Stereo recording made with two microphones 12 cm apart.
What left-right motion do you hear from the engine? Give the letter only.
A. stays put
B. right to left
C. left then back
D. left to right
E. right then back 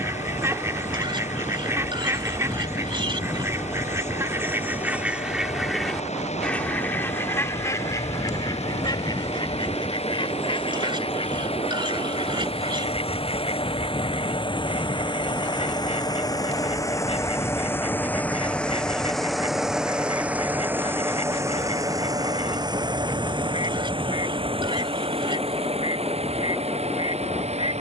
D.